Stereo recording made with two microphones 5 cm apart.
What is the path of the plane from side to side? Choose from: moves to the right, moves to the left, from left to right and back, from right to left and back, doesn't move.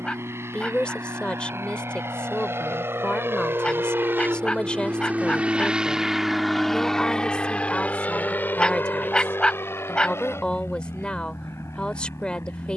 moves to the left.